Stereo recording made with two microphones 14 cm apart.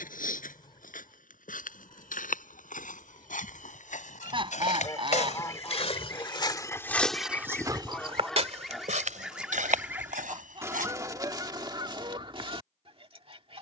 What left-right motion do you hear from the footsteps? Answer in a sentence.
In this clip you hear the footsteps move to the right.